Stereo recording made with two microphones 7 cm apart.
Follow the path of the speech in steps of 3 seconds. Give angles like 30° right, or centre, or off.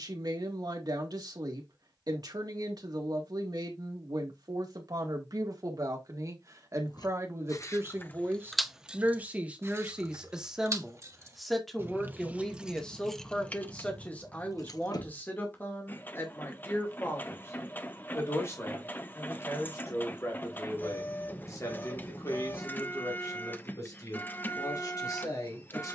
60° right, 60° right, 40° right, 10° right, 20° left, 30° left, 40° left, 50° left, 50° left.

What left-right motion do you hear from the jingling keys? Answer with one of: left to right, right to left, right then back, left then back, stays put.
right then back.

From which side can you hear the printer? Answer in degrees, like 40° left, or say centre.
20° left.